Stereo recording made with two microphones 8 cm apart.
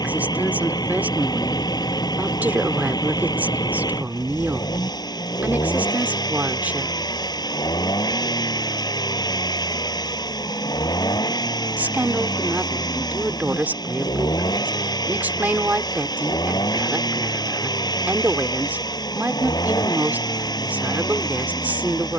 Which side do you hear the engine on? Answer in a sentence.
You can hear the engine on the left.